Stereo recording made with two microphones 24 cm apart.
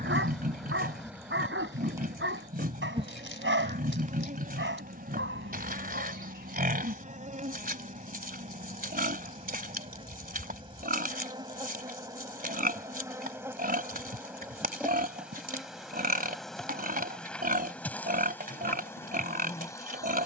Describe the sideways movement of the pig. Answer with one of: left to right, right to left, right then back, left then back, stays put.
stays put.